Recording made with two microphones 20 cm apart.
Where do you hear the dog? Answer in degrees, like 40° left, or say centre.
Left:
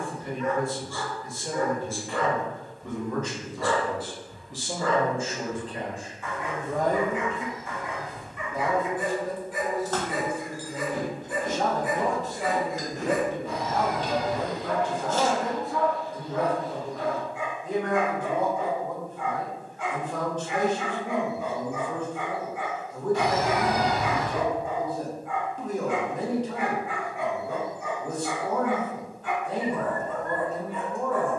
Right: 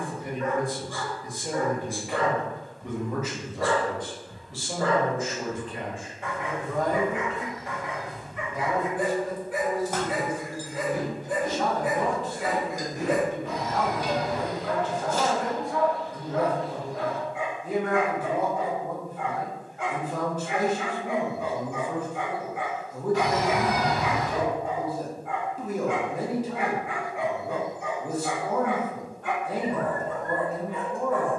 70° right.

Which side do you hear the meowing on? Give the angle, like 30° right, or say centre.
50° left.